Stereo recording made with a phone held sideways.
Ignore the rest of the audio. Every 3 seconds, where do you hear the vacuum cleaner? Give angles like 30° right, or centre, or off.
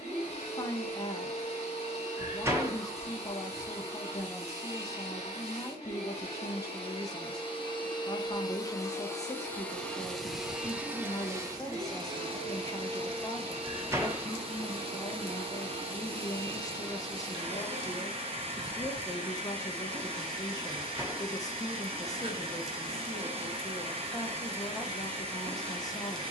40° left, 40° left, 30° left, centre, 40° right, 40° right, 40° right, 40° right, 40° right.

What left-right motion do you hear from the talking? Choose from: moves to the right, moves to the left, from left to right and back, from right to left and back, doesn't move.
doesn't move.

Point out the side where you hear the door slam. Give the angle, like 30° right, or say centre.
20° right.